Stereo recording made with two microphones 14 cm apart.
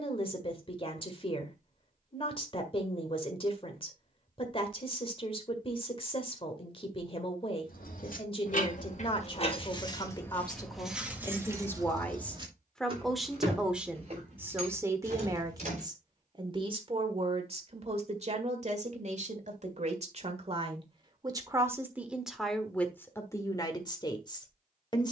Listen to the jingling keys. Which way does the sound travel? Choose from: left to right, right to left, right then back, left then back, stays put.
left to right.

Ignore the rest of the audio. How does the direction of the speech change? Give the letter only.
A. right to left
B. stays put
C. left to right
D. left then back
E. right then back
E.